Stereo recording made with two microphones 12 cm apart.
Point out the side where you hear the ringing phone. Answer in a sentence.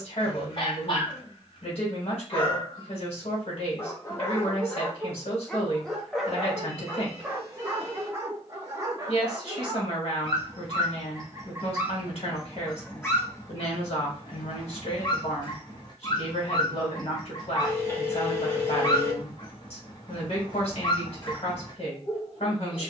In this clip you hear the ringing phone on the left.